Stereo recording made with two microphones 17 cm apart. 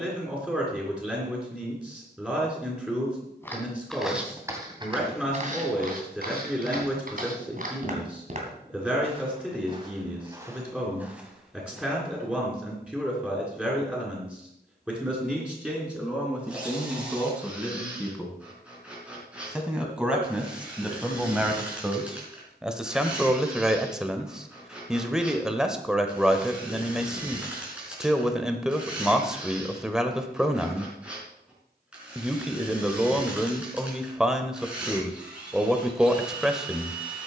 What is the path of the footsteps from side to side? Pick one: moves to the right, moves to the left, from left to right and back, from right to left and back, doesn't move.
from left to right and back.